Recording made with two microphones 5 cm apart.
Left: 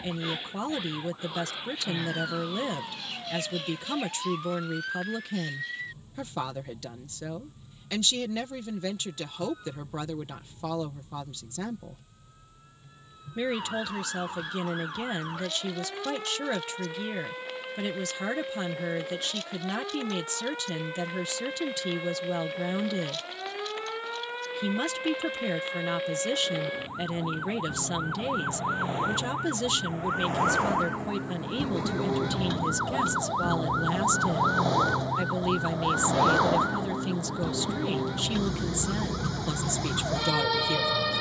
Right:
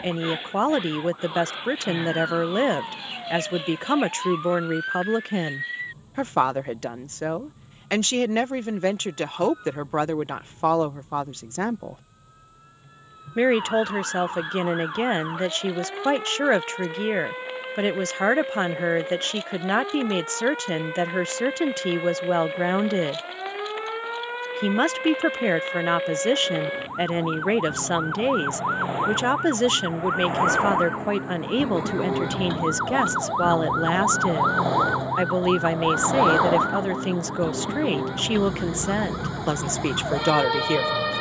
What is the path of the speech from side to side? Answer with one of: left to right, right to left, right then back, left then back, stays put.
stays put.